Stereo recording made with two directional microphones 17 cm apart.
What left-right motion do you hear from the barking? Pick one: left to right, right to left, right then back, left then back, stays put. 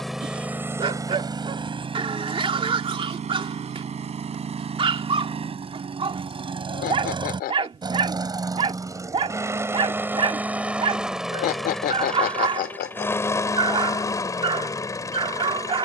stays put.